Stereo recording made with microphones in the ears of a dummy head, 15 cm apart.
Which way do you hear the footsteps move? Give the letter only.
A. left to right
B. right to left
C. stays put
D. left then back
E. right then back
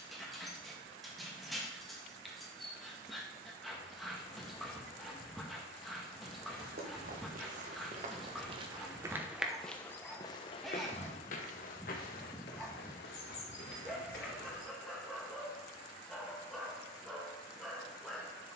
B.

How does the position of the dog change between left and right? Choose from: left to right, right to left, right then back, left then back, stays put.
stays put.